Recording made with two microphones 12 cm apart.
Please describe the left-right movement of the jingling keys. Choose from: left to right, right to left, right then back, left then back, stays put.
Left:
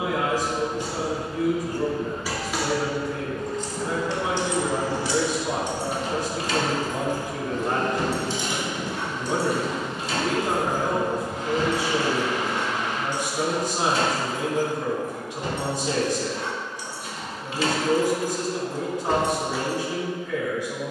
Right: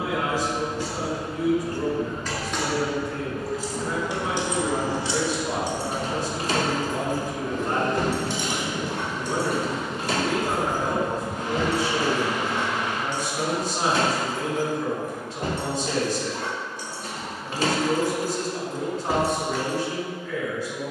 right then back.